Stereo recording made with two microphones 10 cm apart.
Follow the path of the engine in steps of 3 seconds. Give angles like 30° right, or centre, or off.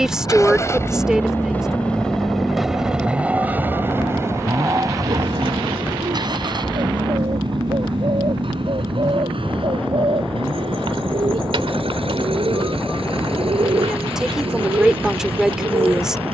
20° left, 30° right, 50° right, 60° right, 70° right, 70° right.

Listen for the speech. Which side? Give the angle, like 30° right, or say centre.
10° right.